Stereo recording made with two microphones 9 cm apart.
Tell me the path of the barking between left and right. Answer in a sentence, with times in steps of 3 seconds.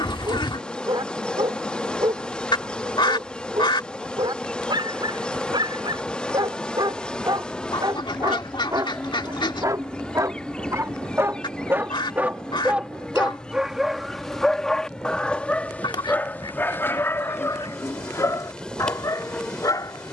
In this clip you hear the barking on the right from 0 s, in the centre from 12 s and on the left from 15 s.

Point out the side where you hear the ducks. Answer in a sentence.
You can hear the ducks on the left.